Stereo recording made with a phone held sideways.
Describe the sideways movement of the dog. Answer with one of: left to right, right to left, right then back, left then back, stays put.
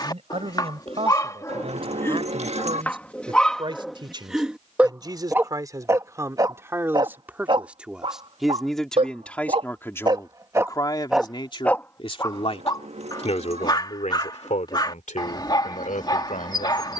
right then back.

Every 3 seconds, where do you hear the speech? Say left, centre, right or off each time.
right, right, centre, left, left, left.